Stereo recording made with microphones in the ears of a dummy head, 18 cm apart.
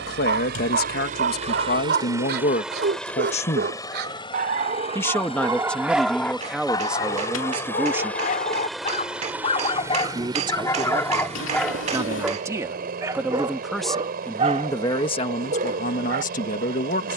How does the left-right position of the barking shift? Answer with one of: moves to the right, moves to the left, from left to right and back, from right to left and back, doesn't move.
from right to left and back.